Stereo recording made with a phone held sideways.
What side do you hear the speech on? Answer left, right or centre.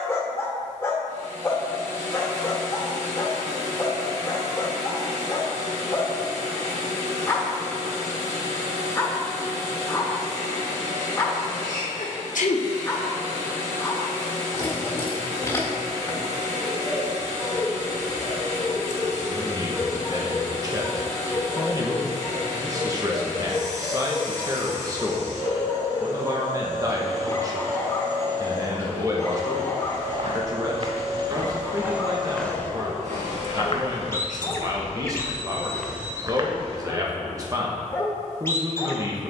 right.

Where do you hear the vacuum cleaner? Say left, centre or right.
right.